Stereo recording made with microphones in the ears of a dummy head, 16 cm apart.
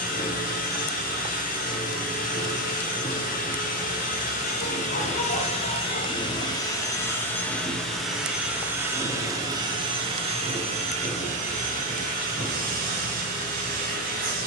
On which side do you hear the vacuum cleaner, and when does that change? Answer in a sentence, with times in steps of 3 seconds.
You can hear the vacuum cleaner on the left from 0 s, in the centre from 6 s and on the right from 9 s.